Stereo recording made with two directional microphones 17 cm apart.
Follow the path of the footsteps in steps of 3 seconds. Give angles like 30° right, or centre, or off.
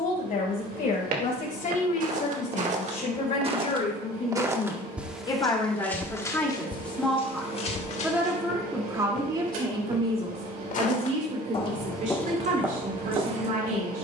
50° right, 10° right, 30° left, 40° left, 20° right.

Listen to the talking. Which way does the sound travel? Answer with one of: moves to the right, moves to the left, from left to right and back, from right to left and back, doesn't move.
moves to the right.